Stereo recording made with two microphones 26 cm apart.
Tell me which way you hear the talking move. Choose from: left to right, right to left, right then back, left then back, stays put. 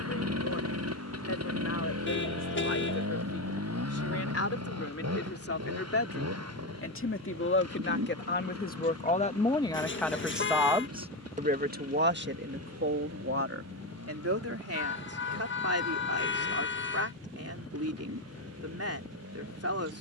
left to right.